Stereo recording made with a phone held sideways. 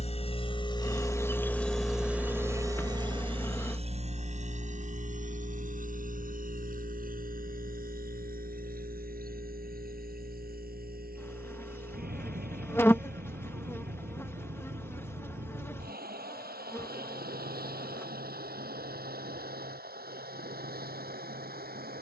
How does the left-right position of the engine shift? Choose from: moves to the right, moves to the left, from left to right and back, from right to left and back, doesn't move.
moves to the right.